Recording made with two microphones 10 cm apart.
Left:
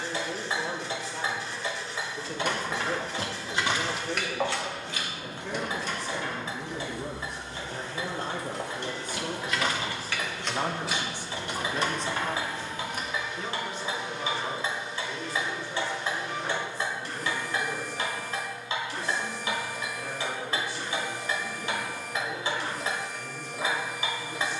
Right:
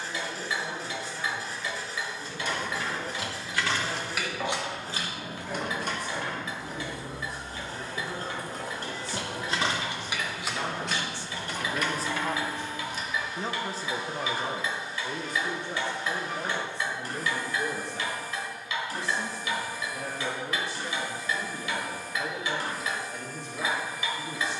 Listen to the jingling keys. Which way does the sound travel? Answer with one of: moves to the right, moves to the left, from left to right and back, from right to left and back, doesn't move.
from left to right and back.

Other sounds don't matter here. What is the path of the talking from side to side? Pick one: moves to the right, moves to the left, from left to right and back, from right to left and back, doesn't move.
moves to the right.